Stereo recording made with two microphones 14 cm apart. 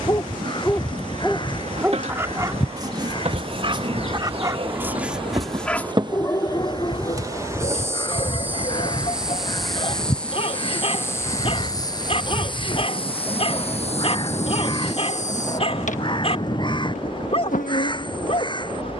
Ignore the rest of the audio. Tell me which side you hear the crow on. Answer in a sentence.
In this clip you hear the crow on the left.